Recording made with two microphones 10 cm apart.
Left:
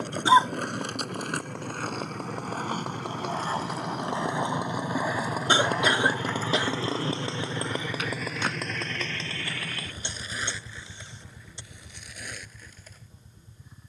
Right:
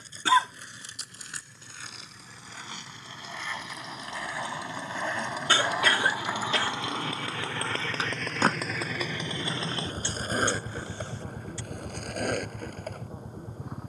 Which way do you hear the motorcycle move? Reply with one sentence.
In this clip you hear the motorcycle move from left to right.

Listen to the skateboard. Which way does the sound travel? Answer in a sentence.
In this clip you hear the skateboard move from left to right.